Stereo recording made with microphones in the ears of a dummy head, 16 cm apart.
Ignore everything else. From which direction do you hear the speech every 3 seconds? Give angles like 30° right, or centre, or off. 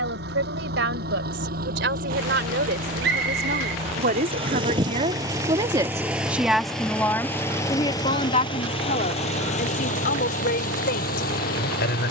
70° right, 40° right, 20° left, 60° left.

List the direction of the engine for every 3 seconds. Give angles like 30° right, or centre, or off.
50° right, 30° right, 10° left, 50° left.